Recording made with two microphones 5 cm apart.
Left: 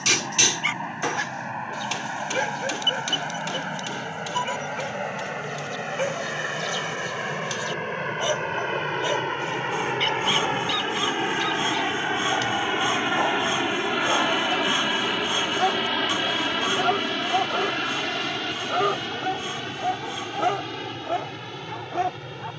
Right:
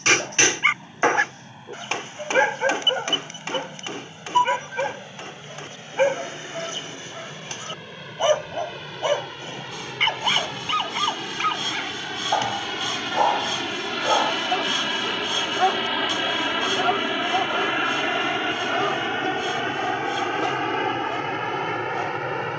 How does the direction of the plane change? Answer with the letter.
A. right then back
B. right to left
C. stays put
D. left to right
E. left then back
D.